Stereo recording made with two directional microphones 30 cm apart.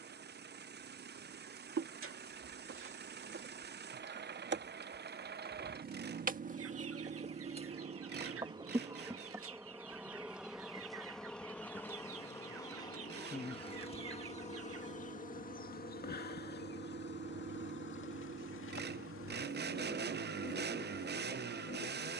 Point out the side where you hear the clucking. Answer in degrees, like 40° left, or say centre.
50° right.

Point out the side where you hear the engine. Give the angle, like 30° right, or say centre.
30° right.